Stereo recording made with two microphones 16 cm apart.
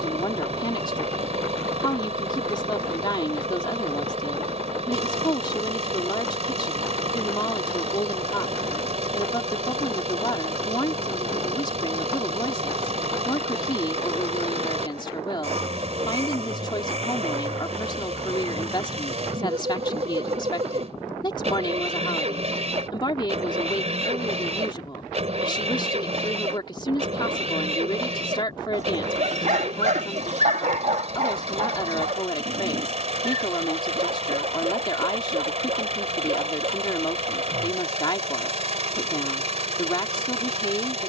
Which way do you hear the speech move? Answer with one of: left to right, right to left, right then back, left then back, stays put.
stays put.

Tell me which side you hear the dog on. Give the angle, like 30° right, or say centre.
50° right.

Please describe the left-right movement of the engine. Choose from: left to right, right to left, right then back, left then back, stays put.
stays put.